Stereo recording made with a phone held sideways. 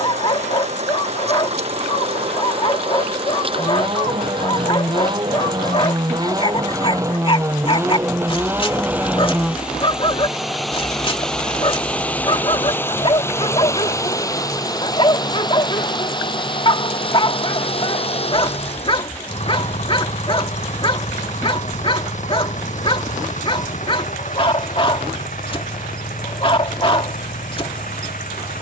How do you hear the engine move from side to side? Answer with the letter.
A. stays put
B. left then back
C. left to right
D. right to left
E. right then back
D.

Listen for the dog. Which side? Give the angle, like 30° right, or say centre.
40° left.